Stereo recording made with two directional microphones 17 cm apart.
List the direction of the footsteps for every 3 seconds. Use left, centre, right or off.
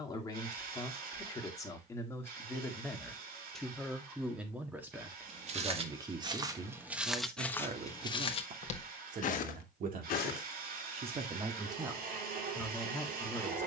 off, right, centre, left, off.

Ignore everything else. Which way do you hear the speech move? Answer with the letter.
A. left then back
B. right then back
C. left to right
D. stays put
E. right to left
B.